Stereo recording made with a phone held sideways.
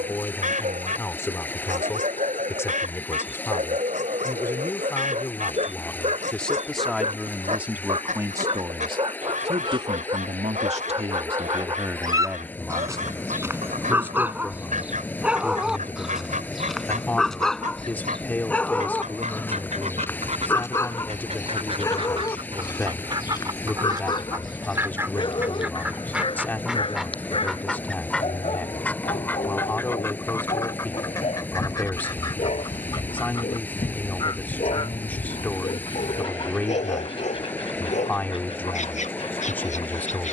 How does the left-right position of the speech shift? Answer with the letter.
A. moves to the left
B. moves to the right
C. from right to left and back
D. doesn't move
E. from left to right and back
E.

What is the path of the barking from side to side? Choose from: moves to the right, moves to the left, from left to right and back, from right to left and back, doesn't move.
moves to the left.